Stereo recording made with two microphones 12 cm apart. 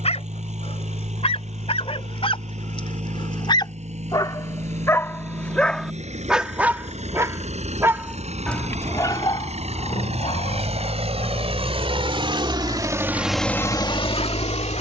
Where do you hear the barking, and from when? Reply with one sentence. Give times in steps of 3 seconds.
In this clip you hear the barking on the left from 0 s, in the centre from 6 s and on the left from 9 s.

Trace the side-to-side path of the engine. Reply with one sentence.
You can hear the engine move from right to left.